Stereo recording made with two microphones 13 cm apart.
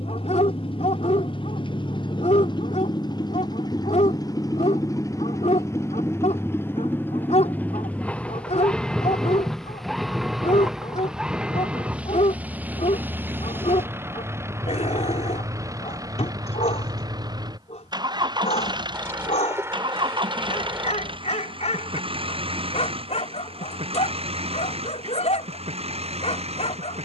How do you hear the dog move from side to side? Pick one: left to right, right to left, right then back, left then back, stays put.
stays put.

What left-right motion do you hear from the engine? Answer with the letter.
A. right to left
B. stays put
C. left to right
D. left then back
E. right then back
C.